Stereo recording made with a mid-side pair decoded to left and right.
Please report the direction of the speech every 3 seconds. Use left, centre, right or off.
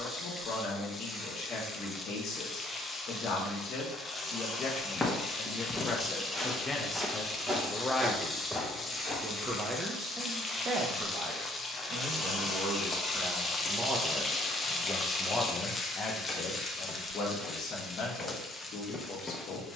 left, left, centre, right, right, left, left.